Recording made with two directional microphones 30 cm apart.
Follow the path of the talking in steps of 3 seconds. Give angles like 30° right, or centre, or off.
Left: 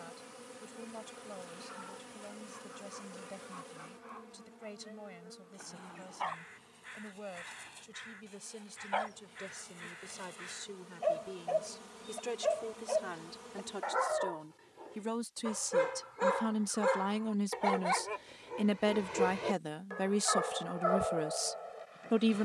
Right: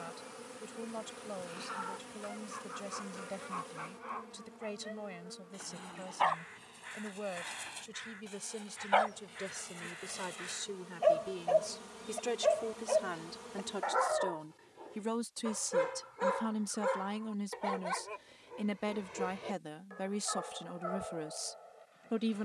40° right, 40° right, 40° right, 30° right, 20° right, 10° left, 30° left, 30° left.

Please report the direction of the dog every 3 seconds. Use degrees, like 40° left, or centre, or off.
60° right, 60° right, 50° right, 40° right, 20° right, 20° left, 50° left, 60° left.